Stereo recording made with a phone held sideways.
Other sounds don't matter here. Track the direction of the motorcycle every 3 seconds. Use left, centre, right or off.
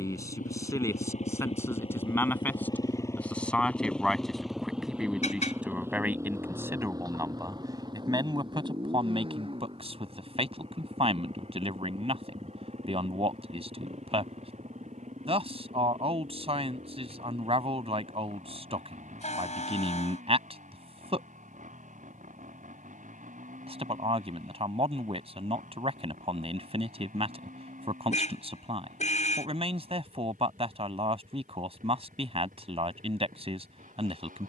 left, centre, right, right, right, right, right, right, right, right, right, right.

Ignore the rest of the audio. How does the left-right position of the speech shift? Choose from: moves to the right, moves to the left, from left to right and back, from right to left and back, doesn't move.
moves to the right.